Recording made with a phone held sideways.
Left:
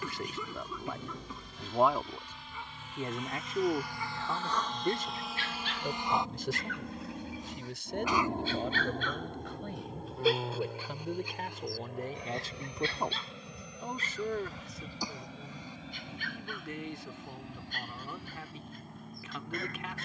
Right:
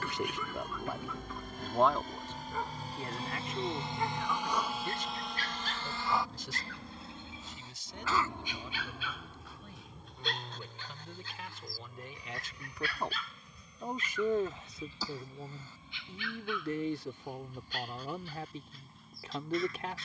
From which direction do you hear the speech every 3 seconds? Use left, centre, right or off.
centre, left, left, left, centre, right, right.